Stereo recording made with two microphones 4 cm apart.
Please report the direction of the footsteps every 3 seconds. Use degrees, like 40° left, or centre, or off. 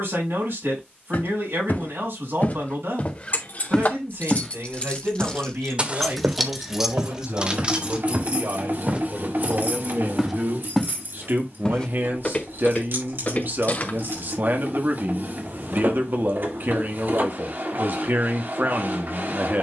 50° left, centre, 40° right, centre, 40° left, off, off.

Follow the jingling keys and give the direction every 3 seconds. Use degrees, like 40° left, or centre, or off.
off, 30° left, 20° right, 60° right, 70° right, off, off.